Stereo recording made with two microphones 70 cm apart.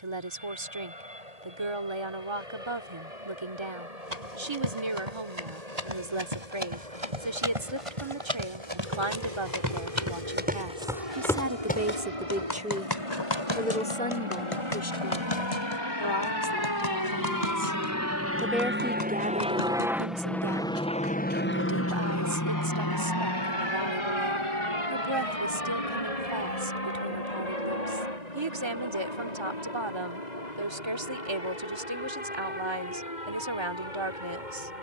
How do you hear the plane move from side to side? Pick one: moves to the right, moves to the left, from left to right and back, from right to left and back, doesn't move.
moves to the left.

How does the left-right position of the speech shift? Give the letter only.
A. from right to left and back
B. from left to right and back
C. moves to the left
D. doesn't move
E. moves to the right
A.